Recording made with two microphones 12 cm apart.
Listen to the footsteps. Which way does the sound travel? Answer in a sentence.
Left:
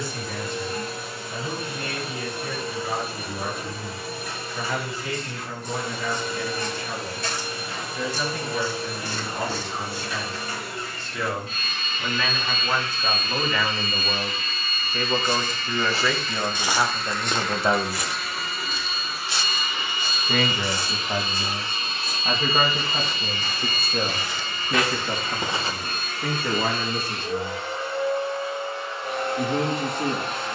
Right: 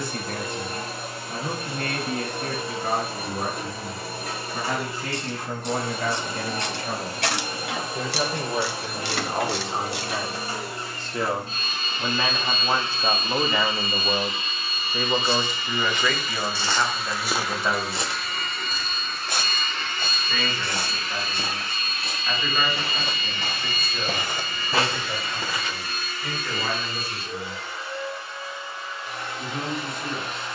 You can hear the footsteps go right and come back.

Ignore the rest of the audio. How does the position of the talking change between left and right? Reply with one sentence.
You can hear the talking go from the right side to the left.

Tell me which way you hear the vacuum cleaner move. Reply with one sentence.
You can hear the vacuum cleaner move to the left.